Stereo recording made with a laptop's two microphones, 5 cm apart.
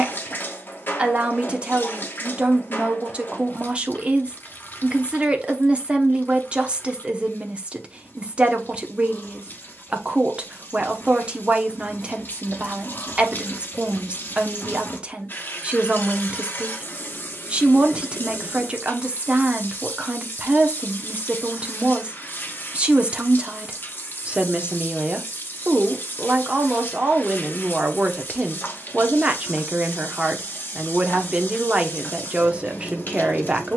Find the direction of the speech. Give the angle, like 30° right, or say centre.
20° right.